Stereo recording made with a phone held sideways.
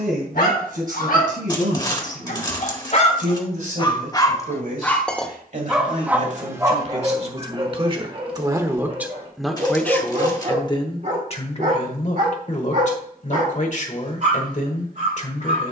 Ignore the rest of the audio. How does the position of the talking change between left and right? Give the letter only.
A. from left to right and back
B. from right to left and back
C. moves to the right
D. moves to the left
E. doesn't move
D.